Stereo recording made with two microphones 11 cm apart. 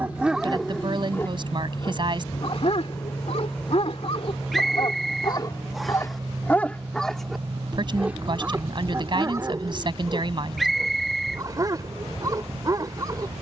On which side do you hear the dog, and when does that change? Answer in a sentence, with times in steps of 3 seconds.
In this clip you hear the dog on the left from 0 s, in the centre from 6 s and on the right from 9 s.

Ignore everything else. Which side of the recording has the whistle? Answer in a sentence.
In this clip you hear the whistle in the centre.